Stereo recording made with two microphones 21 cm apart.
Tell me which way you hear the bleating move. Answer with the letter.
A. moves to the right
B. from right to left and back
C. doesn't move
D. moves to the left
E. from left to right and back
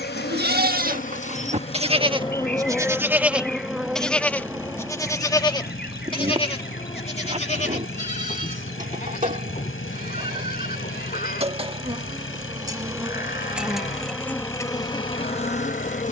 D.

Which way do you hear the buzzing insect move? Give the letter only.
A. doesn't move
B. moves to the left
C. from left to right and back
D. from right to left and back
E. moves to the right
C.